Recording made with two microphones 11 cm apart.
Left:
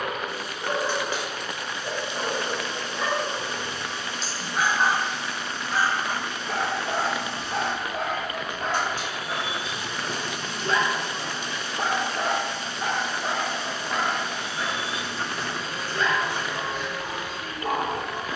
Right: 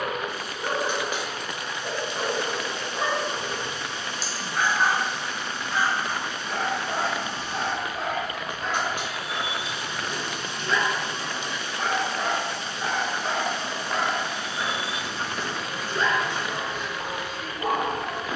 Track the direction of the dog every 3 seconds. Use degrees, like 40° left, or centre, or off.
30° right, centre, 60° left, 40° left, centre, 20° right.